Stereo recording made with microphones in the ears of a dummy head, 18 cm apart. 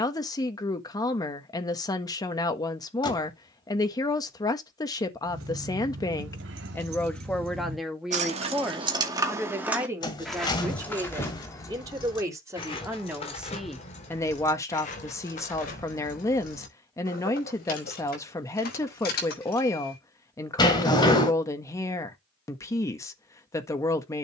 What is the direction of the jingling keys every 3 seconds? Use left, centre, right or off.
off, right, right, centre, left, left, left, off.